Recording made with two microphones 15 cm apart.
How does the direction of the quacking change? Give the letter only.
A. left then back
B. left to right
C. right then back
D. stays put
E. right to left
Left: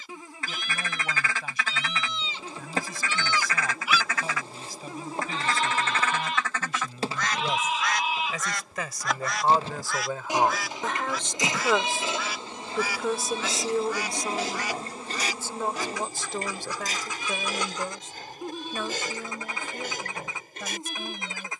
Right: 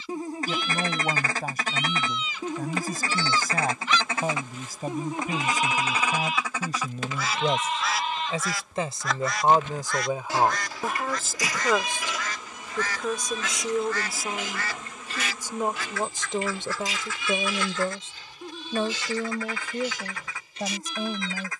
E.